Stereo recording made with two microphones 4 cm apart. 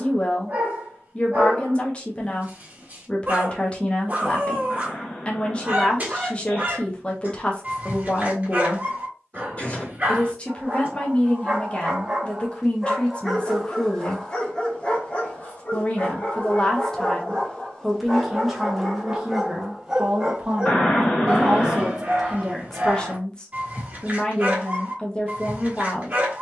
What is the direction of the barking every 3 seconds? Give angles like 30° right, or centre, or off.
30° right, 30° right, 30° right, 30° right, 10° left, 30° left, centre, 30° right, 30° right.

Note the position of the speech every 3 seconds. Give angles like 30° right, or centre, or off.
30° left, 30° left, 30° left, 30° left, 30° left, 20° left, 10° right, centre, 20° left.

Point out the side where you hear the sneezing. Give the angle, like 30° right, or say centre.
30° left.